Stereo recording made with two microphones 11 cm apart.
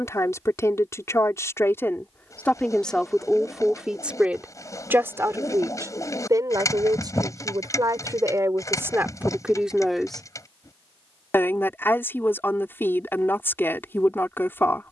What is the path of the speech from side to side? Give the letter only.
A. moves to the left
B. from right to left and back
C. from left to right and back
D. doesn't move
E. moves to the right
C.